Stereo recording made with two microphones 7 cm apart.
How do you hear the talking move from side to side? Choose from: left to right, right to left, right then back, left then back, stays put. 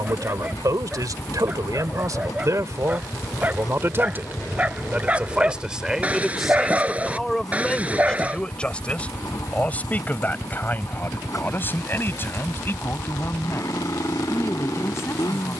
right to left.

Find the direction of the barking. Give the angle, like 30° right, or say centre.
20° right.